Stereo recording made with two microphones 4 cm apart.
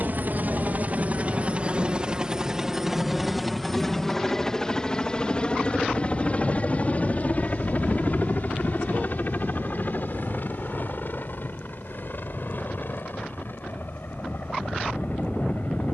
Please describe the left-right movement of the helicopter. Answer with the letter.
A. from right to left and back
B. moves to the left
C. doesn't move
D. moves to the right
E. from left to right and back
B.